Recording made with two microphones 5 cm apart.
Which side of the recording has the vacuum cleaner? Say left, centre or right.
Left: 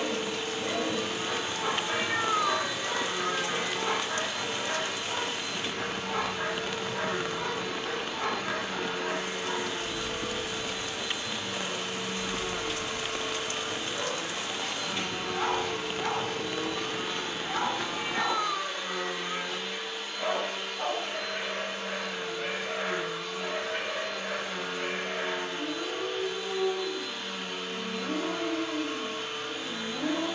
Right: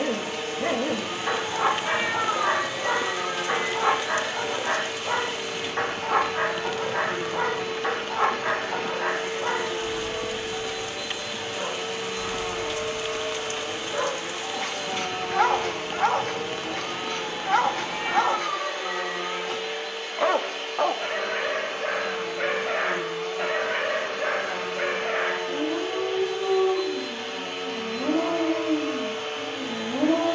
right.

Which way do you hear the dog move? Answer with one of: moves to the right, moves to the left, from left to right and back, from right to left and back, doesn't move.
doesn't move.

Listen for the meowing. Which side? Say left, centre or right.
right.